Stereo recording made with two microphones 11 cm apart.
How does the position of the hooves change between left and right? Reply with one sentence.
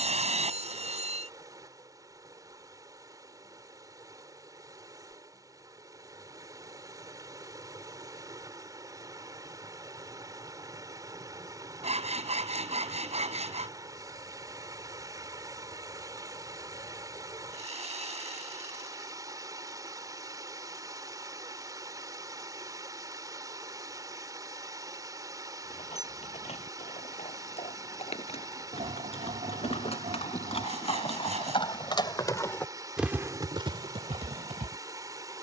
You can hear the hooves move from left to right.